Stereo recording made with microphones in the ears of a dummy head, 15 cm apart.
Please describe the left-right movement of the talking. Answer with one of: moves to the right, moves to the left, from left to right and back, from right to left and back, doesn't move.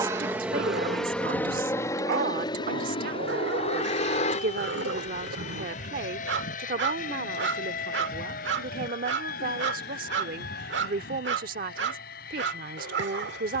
doesn't move.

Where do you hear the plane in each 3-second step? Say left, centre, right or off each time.
centre, left, left, left, left.